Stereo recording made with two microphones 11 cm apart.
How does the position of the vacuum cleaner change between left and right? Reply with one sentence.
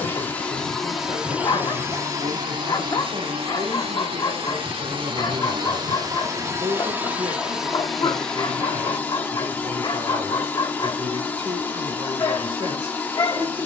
In this clip you hear the vacuum cleaner go right and come back.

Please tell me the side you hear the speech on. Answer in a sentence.
You can hear the speech on the right.